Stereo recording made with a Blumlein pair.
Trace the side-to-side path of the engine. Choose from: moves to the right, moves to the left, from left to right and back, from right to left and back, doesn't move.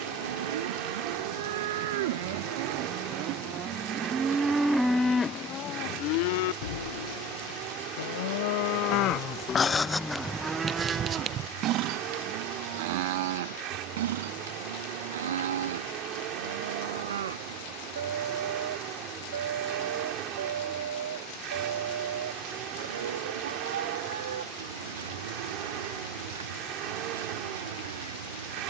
doesn't move.